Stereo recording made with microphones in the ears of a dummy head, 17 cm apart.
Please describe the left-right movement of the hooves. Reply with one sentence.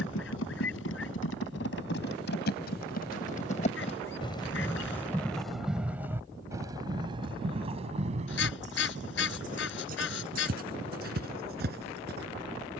In this clip you hear the hooves move from left to right.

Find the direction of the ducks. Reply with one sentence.
In this clip you hear the ducks on the left.